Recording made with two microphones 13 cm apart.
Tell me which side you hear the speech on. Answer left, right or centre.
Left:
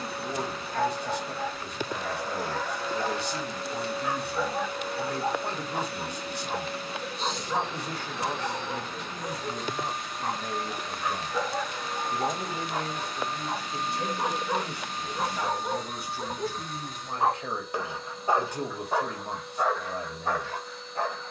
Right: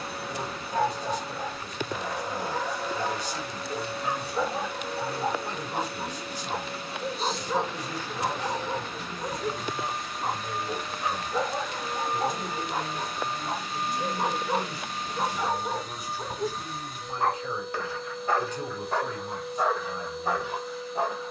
left.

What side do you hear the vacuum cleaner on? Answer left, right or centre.
centre.